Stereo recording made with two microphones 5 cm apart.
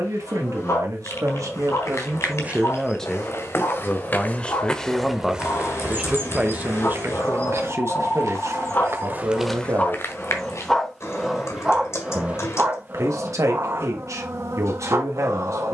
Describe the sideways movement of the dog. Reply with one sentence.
You can hear the dog move from left to right.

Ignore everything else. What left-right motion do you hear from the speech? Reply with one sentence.
You can hear the speech move from right to left and back again.